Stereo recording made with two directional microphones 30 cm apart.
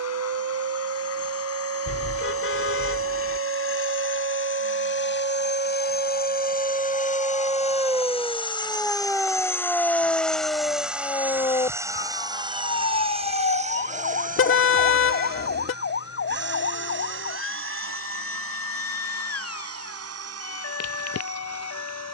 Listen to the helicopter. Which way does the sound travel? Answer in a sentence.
You can hear the helicopter move from left to right.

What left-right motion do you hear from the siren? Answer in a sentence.
You can hear the siren travel towards the left.